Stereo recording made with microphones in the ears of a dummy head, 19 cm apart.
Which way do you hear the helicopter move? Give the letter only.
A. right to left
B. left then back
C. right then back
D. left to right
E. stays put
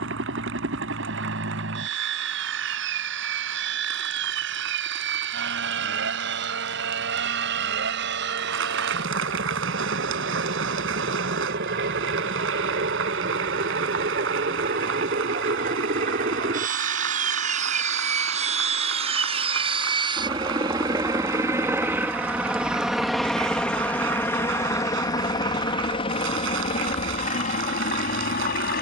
A.